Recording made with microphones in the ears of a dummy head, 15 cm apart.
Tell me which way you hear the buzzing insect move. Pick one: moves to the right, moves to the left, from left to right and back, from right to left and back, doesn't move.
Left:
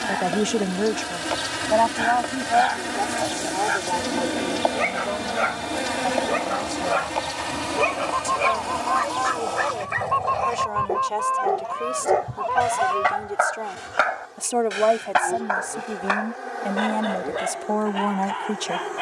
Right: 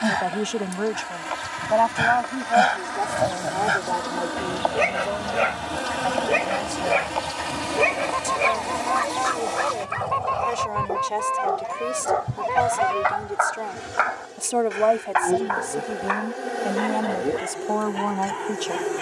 moves to the right.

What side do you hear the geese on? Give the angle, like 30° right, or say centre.
20° right.